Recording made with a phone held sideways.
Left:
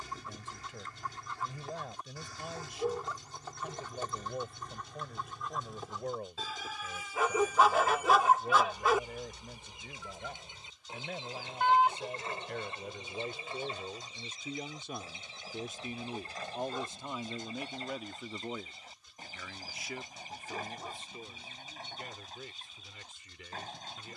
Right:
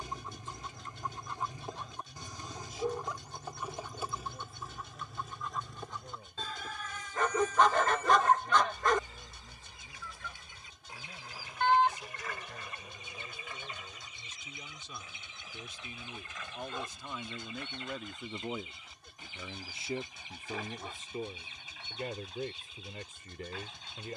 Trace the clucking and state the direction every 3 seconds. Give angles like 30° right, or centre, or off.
20° right, 10° right, 10° left, 20° left, 30° left, 40° left, 40° left, 40° left.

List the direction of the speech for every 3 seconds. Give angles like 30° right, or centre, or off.
70° left, 70° left, 70° left, 70° left, 60° left, 30° left, 20° right, 50° right.